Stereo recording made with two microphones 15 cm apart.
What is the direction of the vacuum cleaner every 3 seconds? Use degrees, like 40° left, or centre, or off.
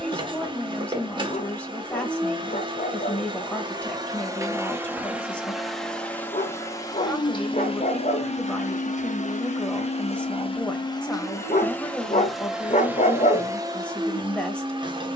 30° right, 20° right, 30° left, 30° left, 20° right.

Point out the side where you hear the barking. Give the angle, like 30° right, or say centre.
50° left.